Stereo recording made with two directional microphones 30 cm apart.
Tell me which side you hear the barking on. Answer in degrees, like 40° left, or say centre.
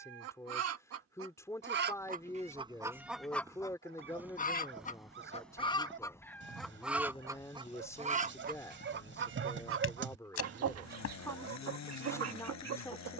40° right.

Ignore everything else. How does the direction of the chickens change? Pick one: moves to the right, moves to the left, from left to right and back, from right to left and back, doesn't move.
from right to left and back.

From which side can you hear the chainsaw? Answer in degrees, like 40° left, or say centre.
60° left.